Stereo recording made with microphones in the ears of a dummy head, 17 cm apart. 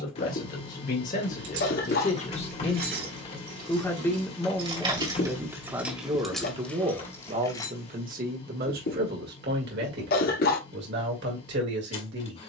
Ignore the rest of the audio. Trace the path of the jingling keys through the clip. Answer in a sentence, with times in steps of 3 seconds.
In this clip you hear the jingling keys on the right from 0 s, in the centre from 6 s and not at all from 9 s.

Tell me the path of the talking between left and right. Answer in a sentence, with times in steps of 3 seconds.
You can hear the talking on the left from 0 s, in the centre from 3 s and on the right from 6 s.